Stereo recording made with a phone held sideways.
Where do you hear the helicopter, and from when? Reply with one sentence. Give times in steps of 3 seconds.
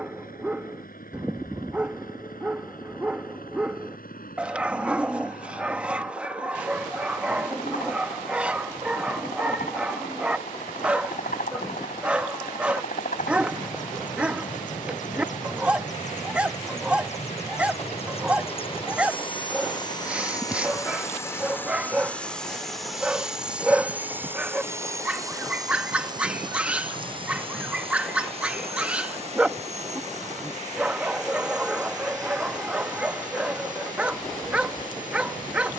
You can hear the helicopter on the left from 0 s, in the centre from 21 s and on the right from 24 s.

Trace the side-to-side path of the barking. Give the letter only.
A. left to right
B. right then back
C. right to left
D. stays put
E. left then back
D.